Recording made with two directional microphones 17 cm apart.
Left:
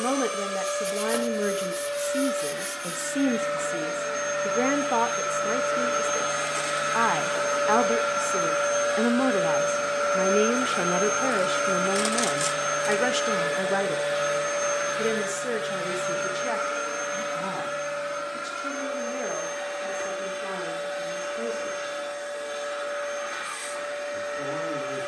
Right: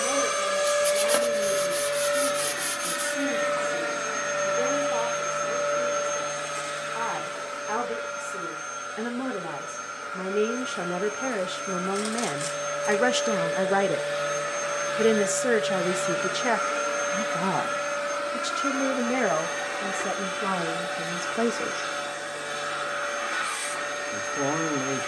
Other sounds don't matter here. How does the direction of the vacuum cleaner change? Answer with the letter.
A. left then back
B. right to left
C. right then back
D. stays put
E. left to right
A.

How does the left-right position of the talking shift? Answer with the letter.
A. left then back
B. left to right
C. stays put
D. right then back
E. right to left
B.